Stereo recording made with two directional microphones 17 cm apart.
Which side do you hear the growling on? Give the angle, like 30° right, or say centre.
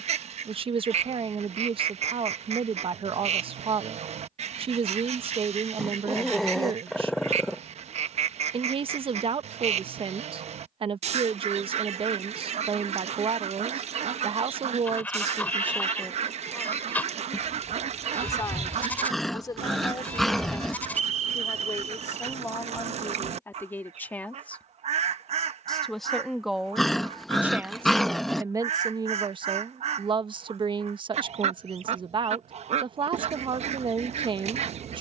centre.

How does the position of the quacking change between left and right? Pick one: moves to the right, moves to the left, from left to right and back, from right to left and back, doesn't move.
doesn't move.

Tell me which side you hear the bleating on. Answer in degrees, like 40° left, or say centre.
10° left.